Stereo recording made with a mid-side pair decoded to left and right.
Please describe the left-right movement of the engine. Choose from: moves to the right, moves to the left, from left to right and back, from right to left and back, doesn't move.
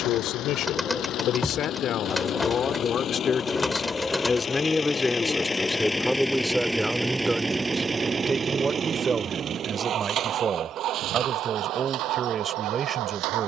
moves to the right.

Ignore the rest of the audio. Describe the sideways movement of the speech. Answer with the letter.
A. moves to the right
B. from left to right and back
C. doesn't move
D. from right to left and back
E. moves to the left
A.